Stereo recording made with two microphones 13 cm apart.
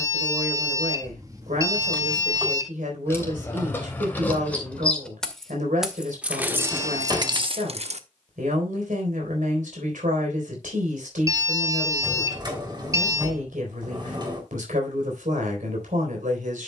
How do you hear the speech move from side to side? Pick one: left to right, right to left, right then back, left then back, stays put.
stays put.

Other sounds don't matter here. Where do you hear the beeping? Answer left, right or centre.
right.